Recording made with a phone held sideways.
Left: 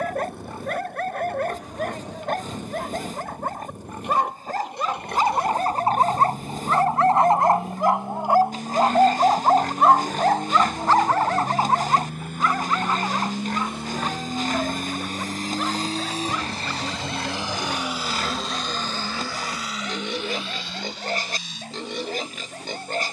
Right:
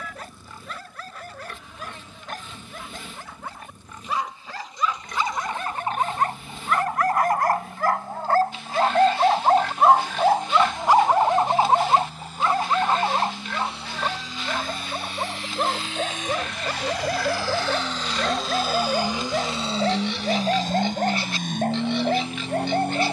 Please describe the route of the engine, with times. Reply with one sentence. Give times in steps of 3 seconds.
In this clip you hear the engine on the left from 0 s and on the right from 18 s.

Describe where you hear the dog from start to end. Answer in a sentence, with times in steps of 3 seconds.
In this clip you hear the dog on the left from 0 s, in the centre from 9 s and on the right from 12 s.